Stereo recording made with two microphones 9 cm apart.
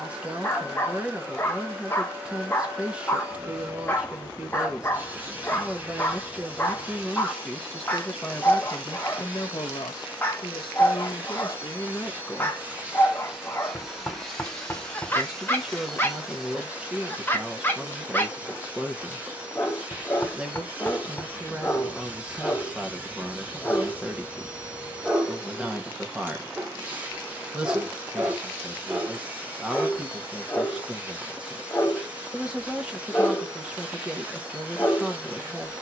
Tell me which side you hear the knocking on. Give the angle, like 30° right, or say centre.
20° left.